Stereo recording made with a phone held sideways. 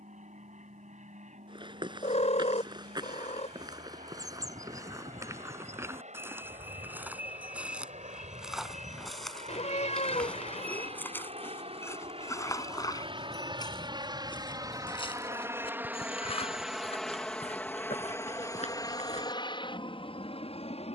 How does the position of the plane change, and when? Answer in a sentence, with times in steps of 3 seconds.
In this clip you hear the plane on the right from 0 s, in the centre from 15 s and on the left from 18 s.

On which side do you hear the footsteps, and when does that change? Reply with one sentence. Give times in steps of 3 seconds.
In this clip you hear the footsteps on the right from 0 s, in the centre from 6 s and on the left from 12 s.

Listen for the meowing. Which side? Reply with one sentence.
You can hear the meowing on the left.